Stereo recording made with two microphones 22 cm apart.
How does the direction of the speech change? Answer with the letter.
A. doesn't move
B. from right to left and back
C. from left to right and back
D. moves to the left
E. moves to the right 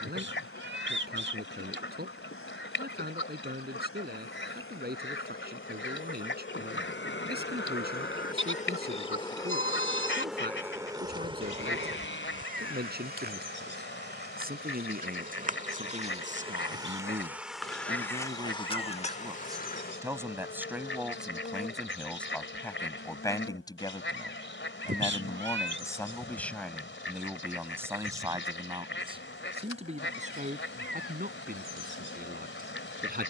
B.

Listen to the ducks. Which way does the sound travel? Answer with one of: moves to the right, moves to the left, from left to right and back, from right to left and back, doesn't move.
doesn't move.